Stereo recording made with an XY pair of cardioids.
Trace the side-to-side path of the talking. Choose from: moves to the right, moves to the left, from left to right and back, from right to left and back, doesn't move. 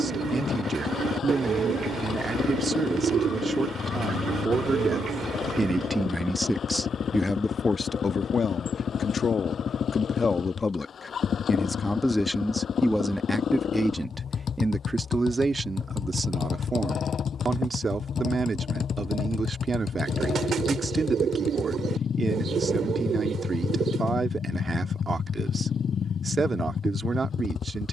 from right to left and back.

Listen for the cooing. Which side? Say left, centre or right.
right.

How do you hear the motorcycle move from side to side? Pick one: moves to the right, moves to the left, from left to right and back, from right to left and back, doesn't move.
doesn't move.